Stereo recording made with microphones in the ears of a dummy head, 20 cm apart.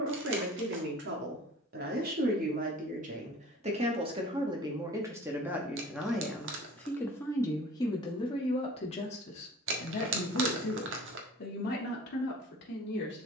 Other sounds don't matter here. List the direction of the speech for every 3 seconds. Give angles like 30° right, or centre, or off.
50° right, 20° right, 10° left, 40° left, 50° left.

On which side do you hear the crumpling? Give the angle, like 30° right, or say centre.
60° right.